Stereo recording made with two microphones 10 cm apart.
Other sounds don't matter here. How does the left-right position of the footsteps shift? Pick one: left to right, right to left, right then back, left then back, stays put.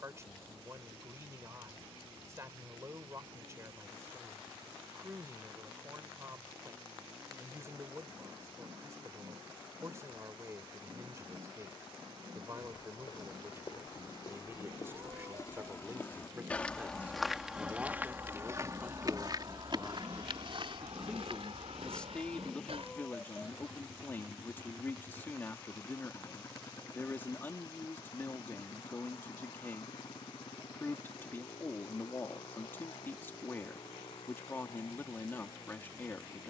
left to right.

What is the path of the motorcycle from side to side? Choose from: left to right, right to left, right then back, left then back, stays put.
right to left.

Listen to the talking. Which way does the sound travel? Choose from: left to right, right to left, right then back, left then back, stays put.
right to left.